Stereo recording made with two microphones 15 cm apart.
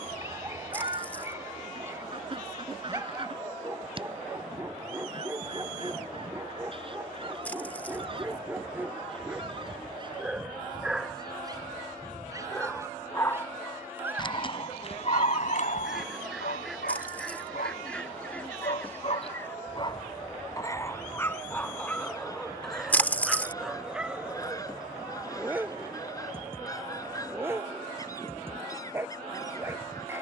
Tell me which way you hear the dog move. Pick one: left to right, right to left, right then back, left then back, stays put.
left then back.